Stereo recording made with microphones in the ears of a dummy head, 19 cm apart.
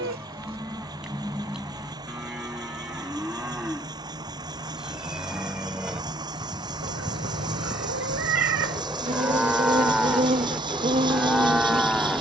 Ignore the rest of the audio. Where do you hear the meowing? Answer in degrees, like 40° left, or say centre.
70° right.